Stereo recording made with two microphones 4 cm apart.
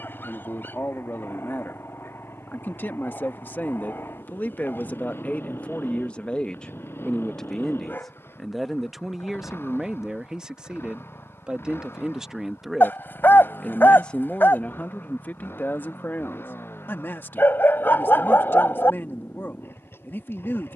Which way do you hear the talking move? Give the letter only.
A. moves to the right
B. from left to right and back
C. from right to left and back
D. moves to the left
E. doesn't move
B.